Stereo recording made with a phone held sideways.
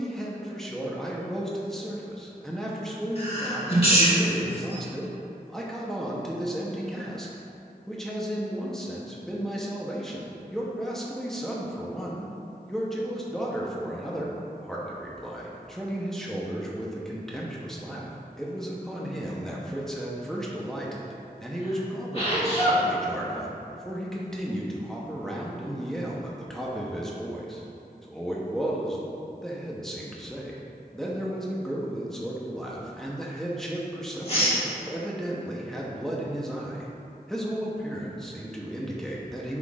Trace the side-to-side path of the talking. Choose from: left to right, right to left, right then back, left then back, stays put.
stays put.